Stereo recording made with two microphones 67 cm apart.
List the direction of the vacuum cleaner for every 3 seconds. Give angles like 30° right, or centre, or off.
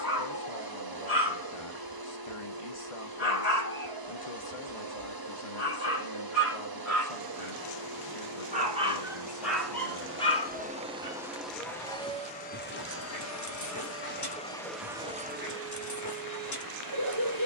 30° right, 30° right, 30° right, 10° right, 10° left, 30° right.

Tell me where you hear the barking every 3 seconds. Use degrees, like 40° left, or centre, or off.
30° right, 30° right, 20° right, 10° left, 30° left, 30° left.